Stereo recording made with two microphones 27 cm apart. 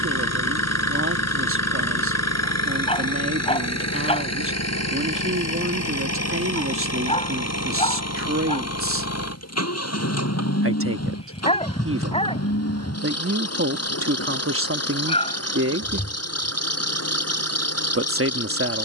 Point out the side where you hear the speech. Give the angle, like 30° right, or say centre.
50° right.